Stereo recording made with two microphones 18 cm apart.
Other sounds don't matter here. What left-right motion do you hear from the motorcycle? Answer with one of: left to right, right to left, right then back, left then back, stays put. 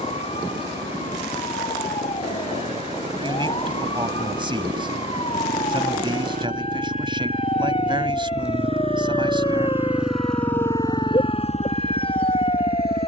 right to left.